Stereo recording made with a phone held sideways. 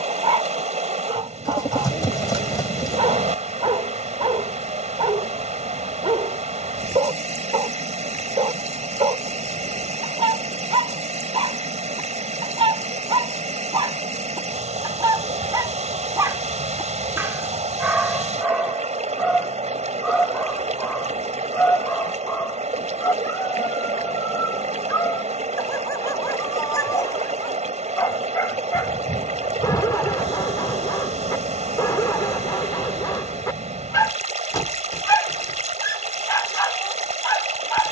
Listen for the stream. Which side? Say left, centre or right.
right.